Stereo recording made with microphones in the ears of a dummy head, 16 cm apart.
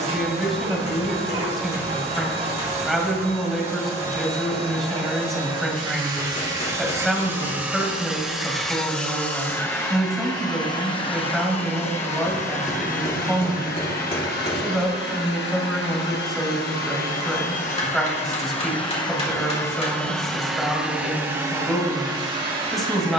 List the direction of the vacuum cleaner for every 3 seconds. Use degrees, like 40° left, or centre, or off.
30° right, 30° right, 10° right, 20° left, 50° left, 50° left, 20° left, 20° right.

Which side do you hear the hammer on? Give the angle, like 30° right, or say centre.
40° left.